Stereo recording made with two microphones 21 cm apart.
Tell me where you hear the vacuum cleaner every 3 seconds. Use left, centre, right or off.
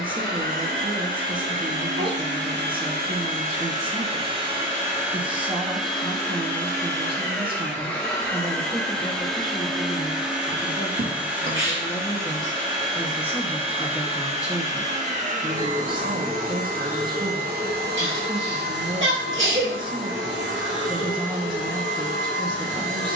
right, right, centre, centre, right, right, right, right.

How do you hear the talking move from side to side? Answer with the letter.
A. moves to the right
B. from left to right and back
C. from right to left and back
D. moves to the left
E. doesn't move
C.